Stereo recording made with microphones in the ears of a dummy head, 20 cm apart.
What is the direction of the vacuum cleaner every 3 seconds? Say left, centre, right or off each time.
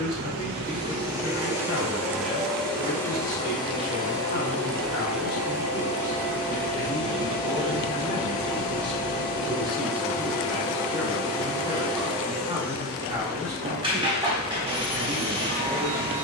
centre, centre, right, right, right, right.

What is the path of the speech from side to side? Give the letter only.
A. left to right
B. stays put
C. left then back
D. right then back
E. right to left
A.